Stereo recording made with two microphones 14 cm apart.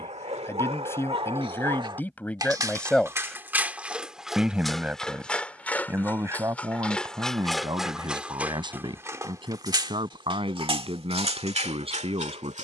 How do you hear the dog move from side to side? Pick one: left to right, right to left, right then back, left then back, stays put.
left then back.